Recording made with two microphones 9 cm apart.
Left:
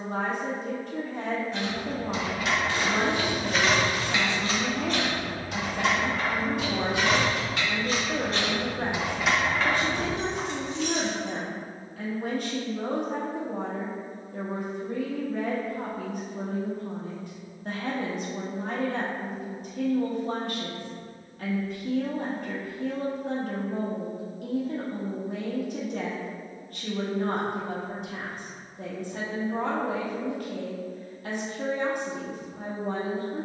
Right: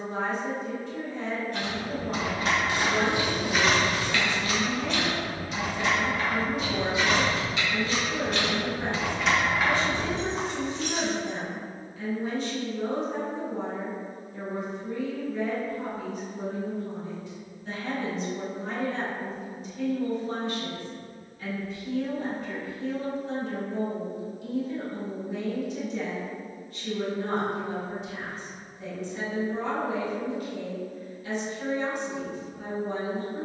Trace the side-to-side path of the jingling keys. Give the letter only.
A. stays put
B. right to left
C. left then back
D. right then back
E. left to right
C.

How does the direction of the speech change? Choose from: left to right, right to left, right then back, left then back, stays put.
stays put.